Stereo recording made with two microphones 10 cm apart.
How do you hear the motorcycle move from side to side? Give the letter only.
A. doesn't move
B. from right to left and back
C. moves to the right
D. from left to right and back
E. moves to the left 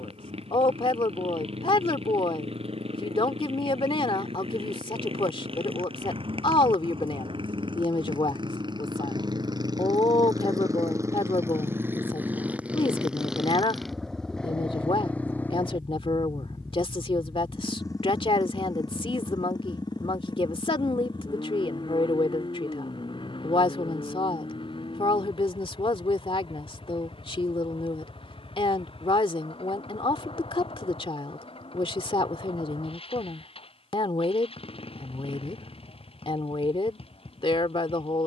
E.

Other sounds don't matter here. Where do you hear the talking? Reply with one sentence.
In this clip you hear the talking on the left.